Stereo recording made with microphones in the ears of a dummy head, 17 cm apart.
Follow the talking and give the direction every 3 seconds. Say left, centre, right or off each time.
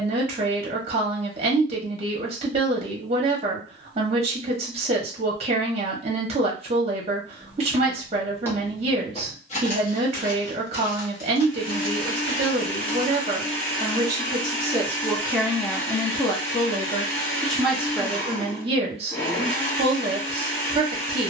right, right, right, right, right, centre, right.